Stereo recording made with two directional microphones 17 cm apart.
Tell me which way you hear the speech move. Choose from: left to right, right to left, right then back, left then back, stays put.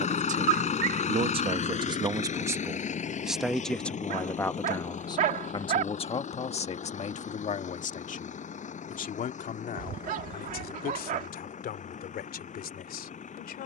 right to left.